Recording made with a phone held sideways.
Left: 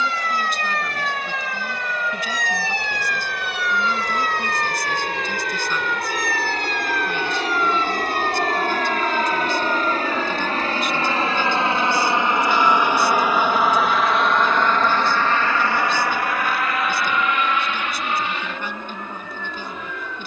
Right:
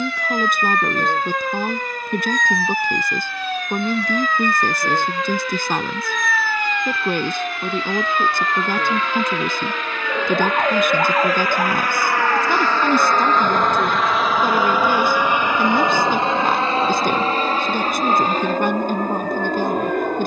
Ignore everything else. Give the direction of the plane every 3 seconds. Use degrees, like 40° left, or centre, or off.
70° left, 60° left, 50° left, 40° left, 10° left, 30° right, 50° right.